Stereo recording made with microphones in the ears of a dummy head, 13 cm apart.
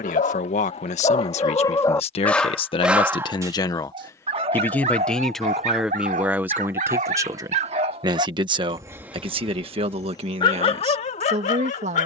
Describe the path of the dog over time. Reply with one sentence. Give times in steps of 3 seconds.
You can hear the dog on the left from 0 s, on the right from 3 s and on the left from 9 s.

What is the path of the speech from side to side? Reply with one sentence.
In this clip you hear the speech travel towards the right.